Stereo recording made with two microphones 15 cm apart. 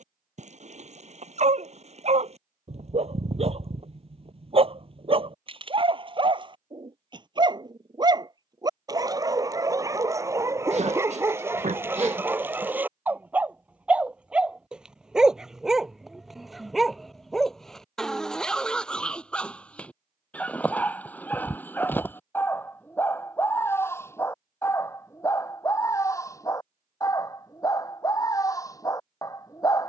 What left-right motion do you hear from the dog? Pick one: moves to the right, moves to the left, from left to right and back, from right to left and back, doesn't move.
moves to the left.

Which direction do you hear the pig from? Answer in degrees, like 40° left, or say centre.
50° right.